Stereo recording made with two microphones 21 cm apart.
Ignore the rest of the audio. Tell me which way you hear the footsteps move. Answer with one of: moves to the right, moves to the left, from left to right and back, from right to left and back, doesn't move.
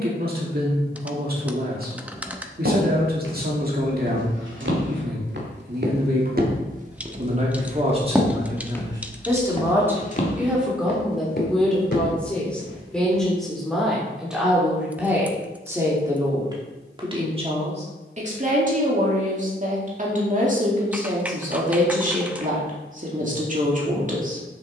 moves to the left.